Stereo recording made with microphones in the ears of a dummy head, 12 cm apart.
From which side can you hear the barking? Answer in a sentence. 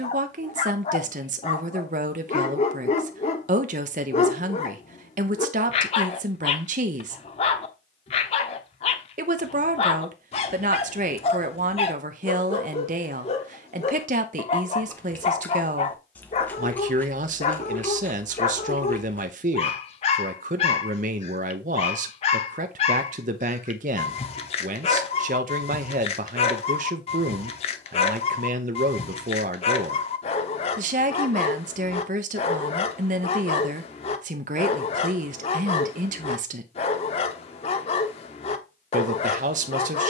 In this clip you hear the barking on the left.